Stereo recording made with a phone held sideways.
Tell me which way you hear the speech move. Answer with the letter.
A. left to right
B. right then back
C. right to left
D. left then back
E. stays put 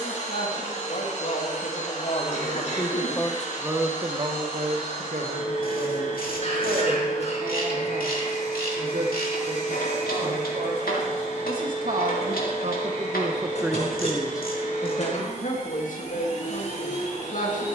B.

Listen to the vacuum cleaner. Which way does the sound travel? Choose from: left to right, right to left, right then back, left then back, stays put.
stays put.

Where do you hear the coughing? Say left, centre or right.
left.